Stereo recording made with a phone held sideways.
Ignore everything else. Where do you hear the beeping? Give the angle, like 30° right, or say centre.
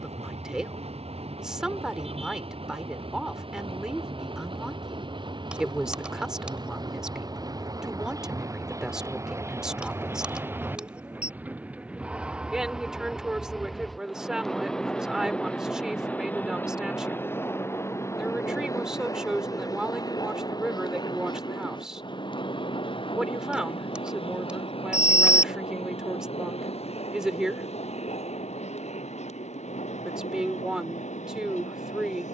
10° right.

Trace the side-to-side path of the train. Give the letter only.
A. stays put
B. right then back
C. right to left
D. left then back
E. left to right
C.